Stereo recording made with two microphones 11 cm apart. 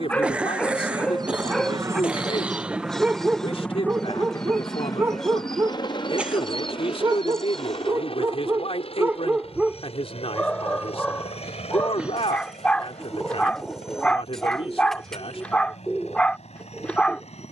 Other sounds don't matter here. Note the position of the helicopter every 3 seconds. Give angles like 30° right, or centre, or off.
30° right, 20° left, 50° left, 60° left, 70° left, 70° left.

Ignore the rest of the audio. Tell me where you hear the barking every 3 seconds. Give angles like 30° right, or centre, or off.
10° left, 20° right, 30° right, centre, 10° left, 10° left.